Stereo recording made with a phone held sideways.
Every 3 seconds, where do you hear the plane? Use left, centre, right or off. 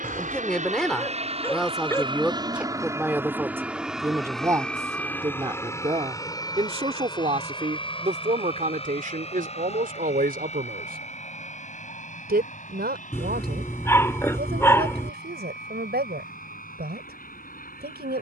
right, centre, left, left, left, left.